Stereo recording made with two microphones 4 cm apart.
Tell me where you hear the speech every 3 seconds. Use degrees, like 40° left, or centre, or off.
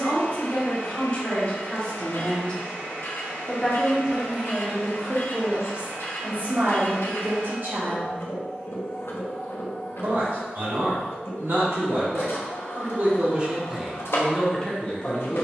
30° left, 10° right, 50° right, 70° right, 10° right.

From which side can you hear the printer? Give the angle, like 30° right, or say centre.
80° left.